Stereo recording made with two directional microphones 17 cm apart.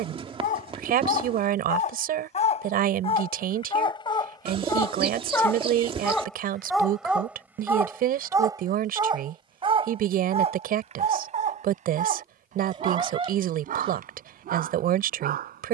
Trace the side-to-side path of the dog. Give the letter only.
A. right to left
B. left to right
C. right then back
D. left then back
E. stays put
B.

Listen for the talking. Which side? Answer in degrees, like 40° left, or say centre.
60° right.